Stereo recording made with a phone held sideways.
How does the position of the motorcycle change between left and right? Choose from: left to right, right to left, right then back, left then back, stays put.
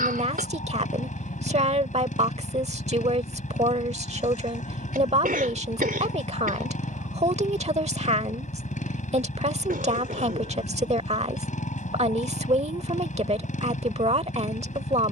stays put.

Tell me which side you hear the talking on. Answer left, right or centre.
right.